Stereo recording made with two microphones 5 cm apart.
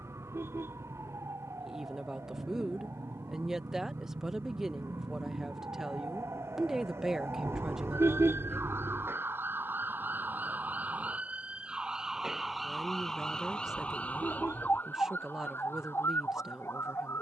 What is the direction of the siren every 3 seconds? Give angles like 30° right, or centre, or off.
80° right, 70° right, 60° right, 40° right, 10° left, 50° left.